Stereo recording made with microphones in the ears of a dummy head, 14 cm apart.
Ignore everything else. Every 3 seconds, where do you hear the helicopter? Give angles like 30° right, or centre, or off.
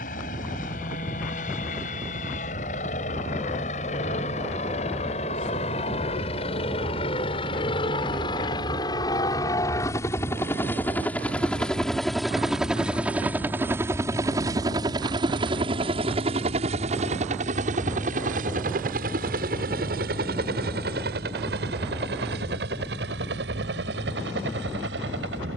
50° left, 40° left, 30° left, 10° left, 10° right, 40° right, 60° right, 70° right, 70° right.